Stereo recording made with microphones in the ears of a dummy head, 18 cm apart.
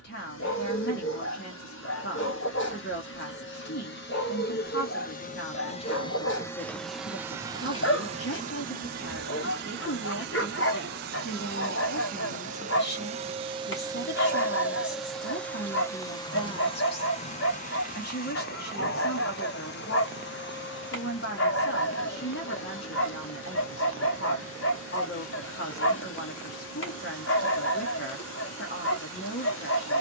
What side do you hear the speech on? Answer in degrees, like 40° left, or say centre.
50° left.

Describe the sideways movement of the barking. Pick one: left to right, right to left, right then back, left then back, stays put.
stays put.